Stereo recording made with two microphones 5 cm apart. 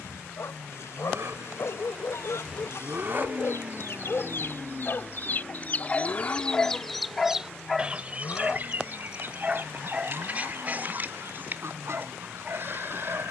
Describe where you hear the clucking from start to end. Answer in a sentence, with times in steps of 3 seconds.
You can hear the clucking on the left from 0 s, in the centre from 6 s and on the right from 9 s.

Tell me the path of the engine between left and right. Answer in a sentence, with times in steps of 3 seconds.
In this clip you hear the engine on the right from 0 s, in the centre from 3 s and on the left from 6 s.